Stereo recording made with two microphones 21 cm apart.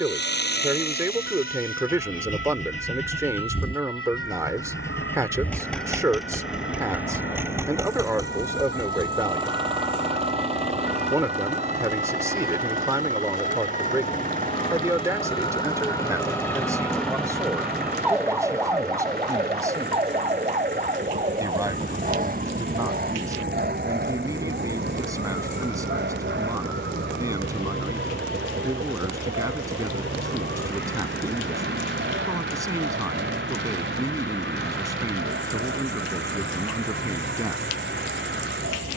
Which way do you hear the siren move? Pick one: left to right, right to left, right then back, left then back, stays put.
left to right.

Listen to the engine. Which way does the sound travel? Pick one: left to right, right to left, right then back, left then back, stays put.
left to right.